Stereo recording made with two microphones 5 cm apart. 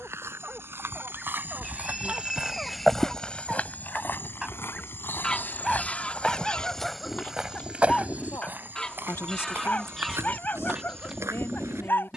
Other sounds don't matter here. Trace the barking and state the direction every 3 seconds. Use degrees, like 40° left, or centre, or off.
20° right, 10° right, 10° left, 40° left.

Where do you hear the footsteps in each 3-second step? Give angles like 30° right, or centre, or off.
40° right, 40° left, 10° right, 60° right.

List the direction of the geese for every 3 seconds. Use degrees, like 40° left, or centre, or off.
10° right, 20° left, 20° left, centre.